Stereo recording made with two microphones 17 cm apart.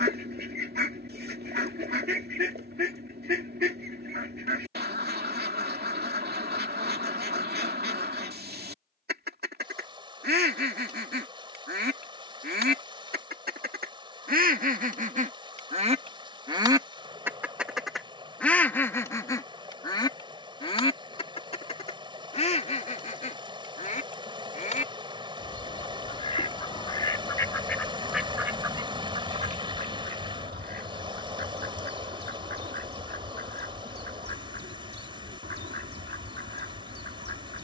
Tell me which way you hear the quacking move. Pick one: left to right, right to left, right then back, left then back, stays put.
left then back.